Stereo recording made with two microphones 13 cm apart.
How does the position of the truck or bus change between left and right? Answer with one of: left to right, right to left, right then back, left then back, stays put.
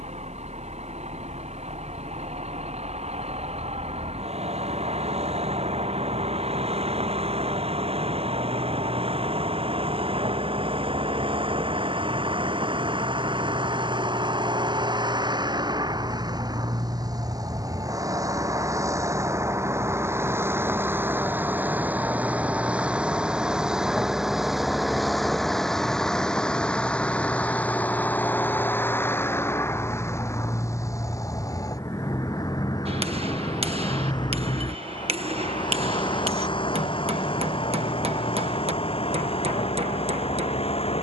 right to left.